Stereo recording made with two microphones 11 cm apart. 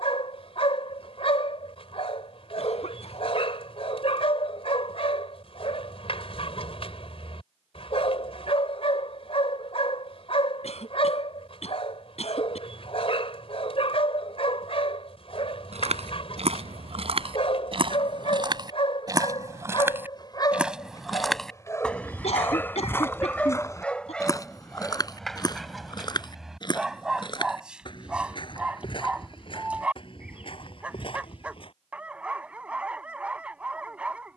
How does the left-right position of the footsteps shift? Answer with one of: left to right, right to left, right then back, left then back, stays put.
right to left.